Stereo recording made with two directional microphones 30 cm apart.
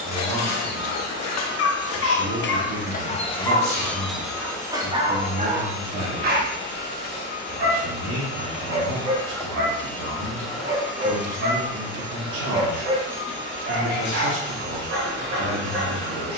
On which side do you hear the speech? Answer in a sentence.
In this clip you hear the speech on the right.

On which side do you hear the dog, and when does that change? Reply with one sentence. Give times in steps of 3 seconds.
You can hear the dog on the left from 0 s, in the centre from 3 s and on the right from 6 s.